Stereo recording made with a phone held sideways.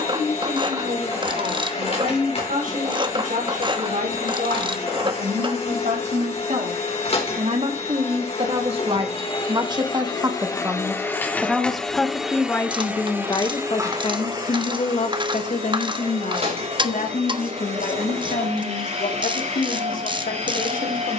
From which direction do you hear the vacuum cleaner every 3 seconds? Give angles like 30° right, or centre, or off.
50° left, 50° left, 50° left, 20° left, 20° right, 50° right, 50° right.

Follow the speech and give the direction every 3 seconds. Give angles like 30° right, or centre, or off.
70° right, 60° right, 50° right, 20° right, 30° left, 60° left, 80° left.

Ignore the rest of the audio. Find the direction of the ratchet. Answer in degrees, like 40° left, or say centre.
30° right.